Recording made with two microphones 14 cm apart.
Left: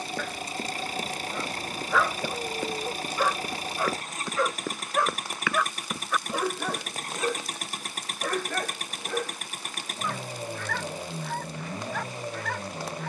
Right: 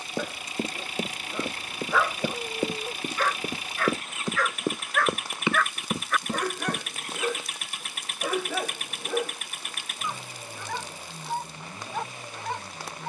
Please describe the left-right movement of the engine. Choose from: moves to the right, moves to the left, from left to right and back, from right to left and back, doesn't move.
doesn't move.